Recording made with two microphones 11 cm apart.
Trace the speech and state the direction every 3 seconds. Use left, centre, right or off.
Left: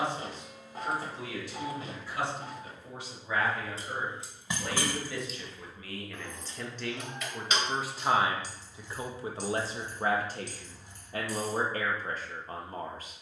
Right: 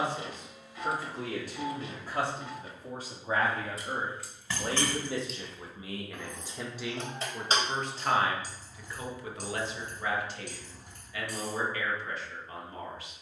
right, right, centre, left, left.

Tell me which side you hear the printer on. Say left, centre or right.
left.